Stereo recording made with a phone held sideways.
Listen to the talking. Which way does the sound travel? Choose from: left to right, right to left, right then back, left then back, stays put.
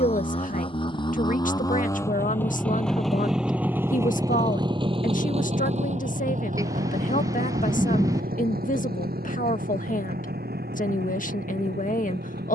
stays put.